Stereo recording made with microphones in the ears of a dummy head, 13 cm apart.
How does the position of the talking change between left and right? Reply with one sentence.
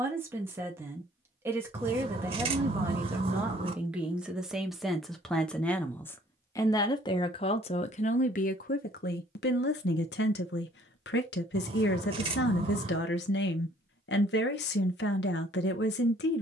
You can hear the talking move from right to left.